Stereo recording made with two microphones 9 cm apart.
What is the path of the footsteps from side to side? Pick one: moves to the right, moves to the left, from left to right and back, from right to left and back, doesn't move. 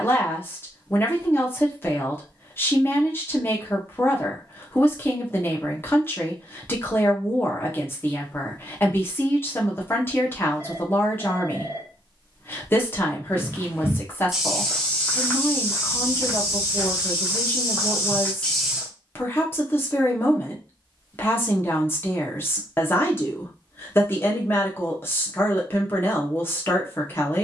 from right to left and back.